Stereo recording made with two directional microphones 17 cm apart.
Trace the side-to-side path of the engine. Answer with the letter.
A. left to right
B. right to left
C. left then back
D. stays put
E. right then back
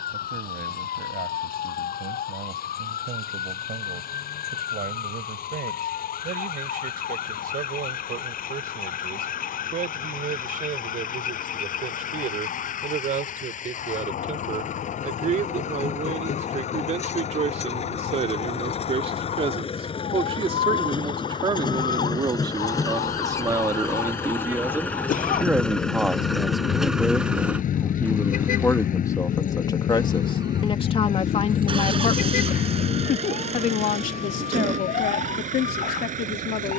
A.